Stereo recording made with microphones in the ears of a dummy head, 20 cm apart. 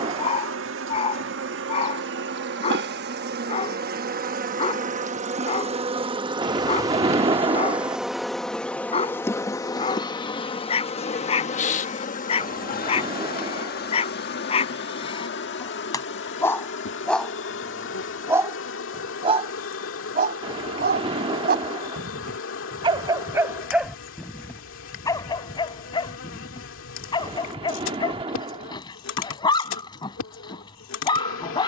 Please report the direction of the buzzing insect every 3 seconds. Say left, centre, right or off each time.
right, right, centre, left, left, left, left, left, left, left, left.